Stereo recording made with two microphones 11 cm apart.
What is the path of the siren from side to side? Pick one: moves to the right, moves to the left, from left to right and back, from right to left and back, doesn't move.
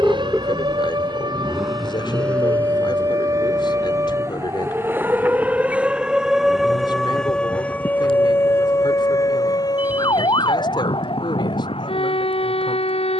moves to the left.